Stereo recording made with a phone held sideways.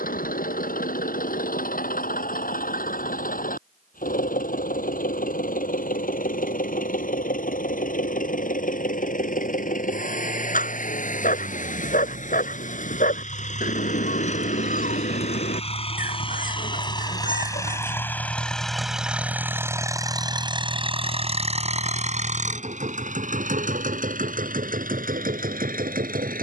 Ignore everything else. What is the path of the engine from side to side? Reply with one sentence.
In this clip you hear the engine move from left to right.